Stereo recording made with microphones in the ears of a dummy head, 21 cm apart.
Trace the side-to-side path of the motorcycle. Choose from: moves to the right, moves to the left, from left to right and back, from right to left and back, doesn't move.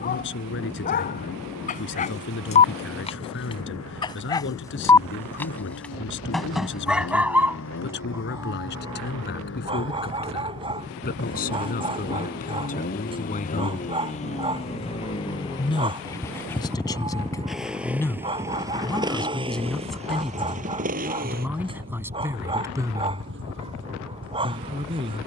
moves to the right.